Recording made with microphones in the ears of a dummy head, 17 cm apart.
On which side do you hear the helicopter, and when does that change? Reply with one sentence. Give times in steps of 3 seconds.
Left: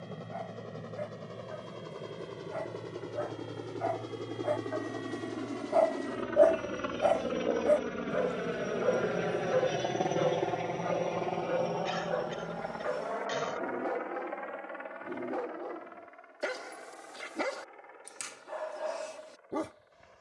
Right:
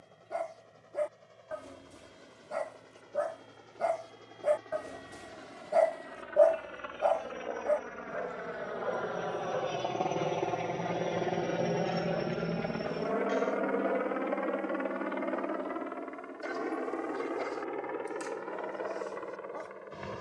In this clip you hear the helicopter on the left from 0 s, in the centre from 9 s and on the right from 12 s.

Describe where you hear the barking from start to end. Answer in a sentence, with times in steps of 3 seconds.
You can hear the barking on the right from 0 s and on the left from 6 s.